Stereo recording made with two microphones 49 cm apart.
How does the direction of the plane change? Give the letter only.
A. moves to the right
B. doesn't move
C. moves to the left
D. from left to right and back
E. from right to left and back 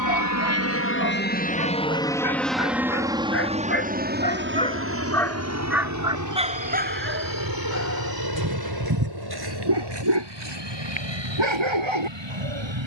A.